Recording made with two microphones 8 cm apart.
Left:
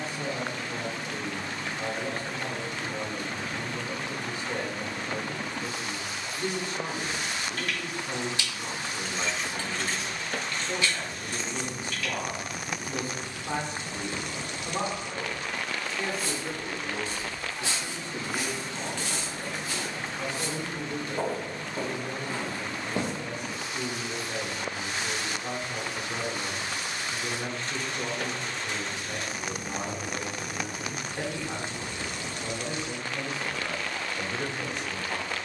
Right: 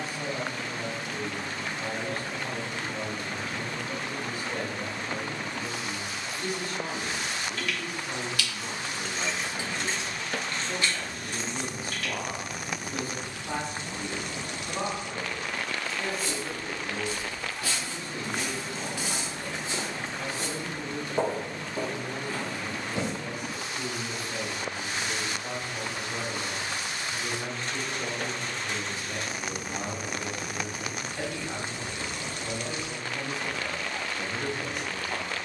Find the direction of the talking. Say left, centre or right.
left.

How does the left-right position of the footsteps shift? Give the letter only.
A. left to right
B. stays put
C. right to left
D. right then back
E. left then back
D.